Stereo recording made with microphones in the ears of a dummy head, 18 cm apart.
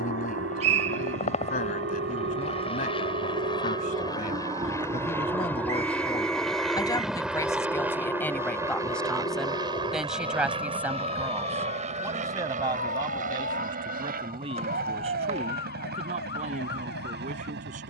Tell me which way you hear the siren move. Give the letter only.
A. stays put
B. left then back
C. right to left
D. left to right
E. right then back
C.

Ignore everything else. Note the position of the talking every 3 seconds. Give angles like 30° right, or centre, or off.
40° left, 30° left, 10° left, 10° right, 20° right, 40° right.